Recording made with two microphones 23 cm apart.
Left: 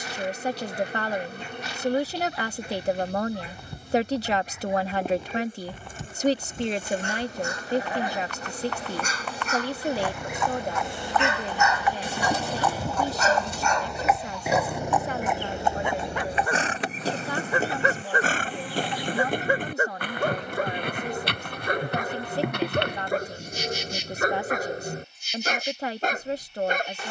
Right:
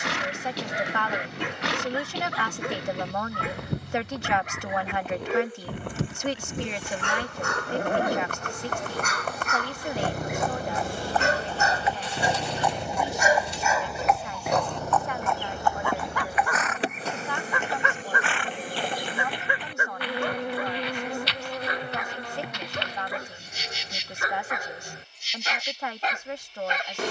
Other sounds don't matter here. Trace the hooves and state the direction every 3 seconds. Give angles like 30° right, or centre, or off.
70° right, 70° right, 60° right, 30° right, centre, 30° left, 50° left, 50° left, off.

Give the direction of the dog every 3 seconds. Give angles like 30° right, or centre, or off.
80° right, 80° right, 70° right, 50° right, 10° right, 20° left, 40° left, 50° left, 50° left.